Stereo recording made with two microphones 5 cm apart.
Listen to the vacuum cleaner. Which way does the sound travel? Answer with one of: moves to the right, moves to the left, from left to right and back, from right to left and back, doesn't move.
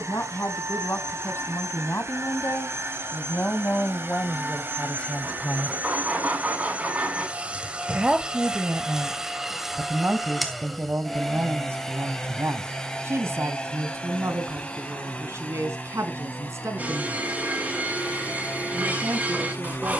moves to the left.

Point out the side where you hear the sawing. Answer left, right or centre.
right.